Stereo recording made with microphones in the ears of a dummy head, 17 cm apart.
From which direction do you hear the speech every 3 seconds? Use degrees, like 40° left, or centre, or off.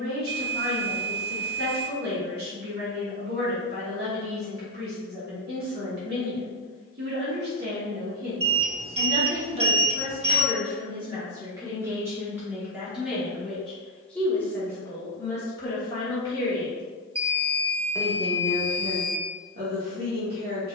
50° right, 50° right, 50° right, 30° right, centre, 20° left, 40° right.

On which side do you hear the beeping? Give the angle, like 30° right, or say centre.
30° right.